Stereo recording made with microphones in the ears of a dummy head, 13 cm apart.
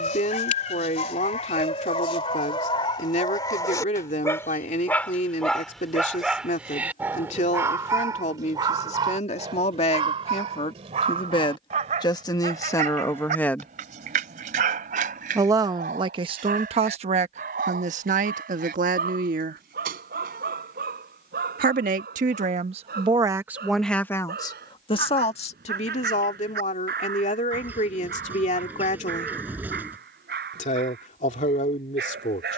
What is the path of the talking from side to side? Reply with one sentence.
In this clip you hear the talking move from left to right and back again.